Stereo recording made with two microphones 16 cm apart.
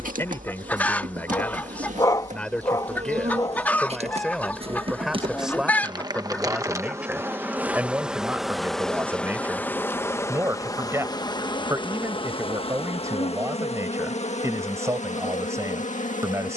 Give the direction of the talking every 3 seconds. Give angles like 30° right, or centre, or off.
10° left, centre, 10° right, 20° right, 20° right, 20° right.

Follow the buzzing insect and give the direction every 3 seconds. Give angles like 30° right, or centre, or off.
60° right, 40° right, 10° right, 20° left, 40° left, 50° left.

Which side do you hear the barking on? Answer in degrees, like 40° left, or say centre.
20° left.